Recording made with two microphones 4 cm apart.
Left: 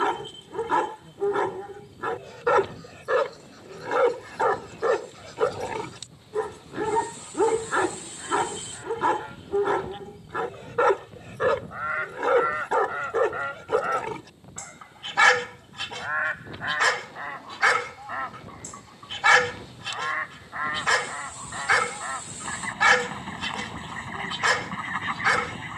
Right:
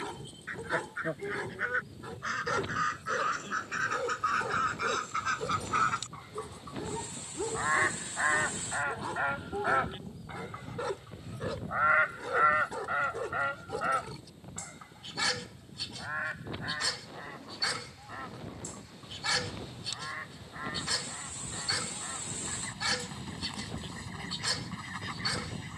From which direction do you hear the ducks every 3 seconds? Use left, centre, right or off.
right, right, right, right, centre, left, left, left, left.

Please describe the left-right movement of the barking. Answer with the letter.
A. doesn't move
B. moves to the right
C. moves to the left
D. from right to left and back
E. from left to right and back
A.